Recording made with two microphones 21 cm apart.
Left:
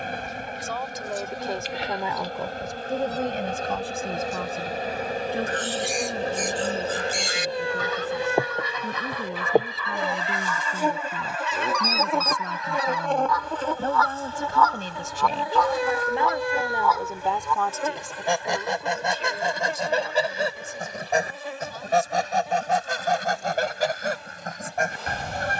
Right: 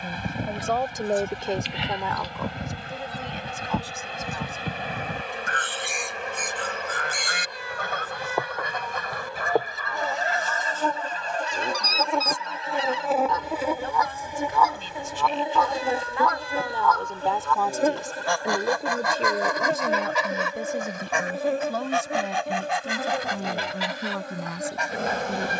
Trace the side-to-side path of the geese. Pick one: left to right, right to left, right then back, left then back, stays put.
right to left.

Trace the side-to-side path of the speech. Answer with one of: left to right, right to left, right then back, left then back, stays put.
left then back.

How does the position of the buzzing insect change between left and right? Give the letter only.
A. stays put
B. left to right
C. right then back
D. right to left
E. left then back
B.